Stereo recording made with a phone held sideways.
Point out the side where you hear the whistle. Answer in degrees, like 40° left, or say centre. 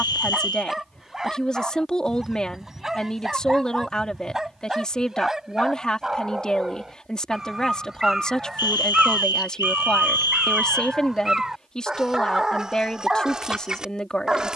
30° left.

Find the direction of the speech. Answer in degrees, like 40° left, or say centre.
10° left.